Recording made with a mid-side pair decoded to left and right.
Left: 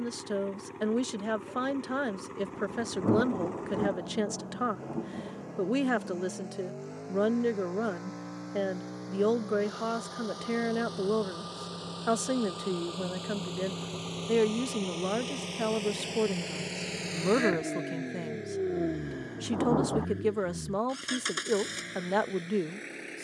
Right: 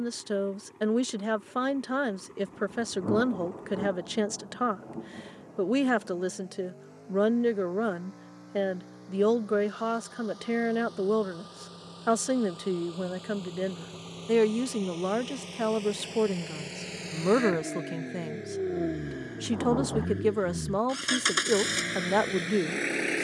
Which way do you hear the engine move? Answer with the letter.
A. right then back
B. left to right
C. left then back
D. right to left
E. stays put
B.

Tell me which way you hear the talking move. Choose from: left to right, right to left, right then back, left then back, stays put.
stays put.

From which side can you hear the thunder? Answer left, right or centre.
left.